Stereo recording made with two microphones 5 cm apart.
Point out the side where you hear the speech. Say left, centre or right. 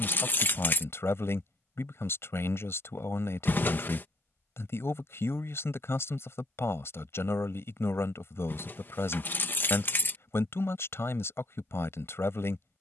left.